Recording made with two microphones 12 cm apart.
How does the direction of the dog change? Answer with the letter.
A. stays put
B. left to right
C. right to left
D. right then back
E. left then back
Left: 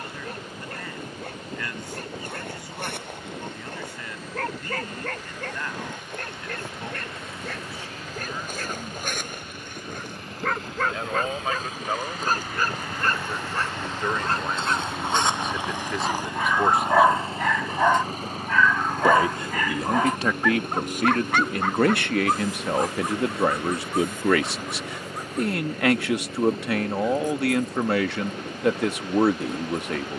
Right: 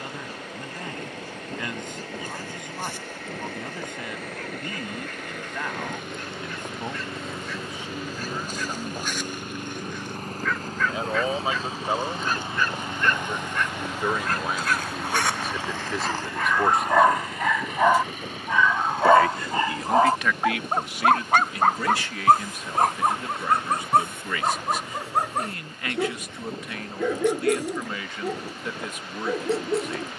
B.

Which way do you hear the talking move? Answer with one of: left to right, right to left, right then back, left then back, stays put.
right to left.